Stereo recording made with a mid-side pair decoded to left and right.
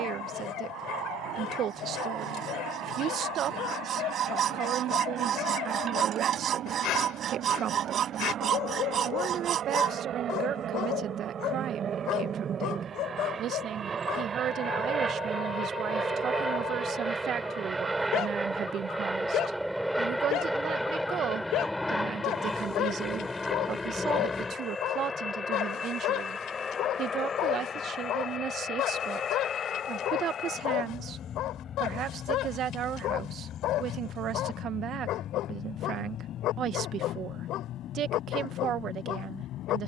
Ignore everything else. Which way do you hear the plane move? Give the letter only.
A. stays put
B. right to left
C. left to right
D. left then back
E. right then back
B.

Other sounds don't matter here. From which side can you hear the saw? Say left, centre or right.
right.